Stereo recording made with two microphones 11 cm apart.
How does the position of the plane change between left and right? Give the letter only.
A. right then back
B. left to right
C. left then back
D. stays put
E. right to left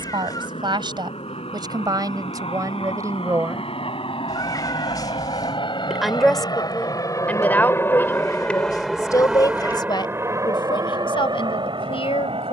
B.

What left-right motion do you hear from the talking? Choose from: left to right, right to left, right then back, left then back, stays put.
right to left.